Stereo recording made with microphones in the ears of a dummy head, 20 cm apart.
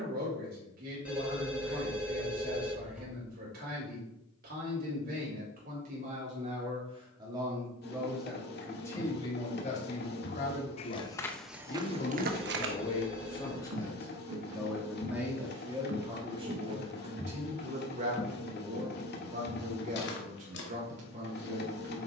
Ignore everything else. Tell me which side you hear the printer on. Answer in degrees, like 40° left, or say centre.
50° left.